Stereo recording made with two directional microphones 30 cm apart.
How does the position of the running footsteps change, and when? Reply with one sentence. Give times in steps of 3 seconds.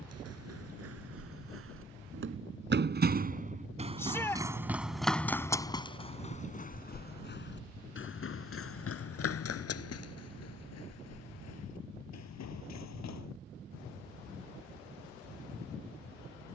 You can hear the running footsteps on the right from 0 s, in the centre from 3 s, on the left from 6 s and not at all from 15 s.